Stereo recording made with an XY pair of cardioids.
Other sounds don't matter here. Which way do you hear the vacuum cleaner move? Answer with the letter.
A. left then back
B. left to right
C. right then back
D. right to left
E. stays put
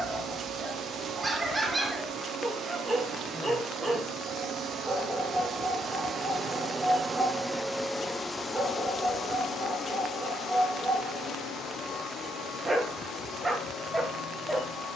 D.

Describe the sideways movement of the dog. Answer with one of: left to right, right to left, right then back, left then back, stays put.
stays put.